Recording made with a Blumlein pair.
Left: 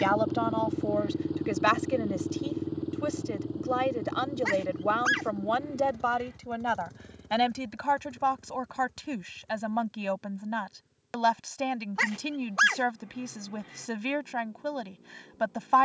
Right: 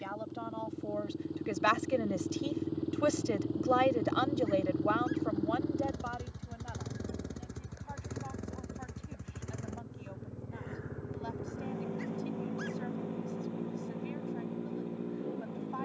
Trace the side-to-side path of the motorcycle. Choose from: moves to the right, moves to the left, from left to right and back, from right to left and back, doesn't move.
moves to the right.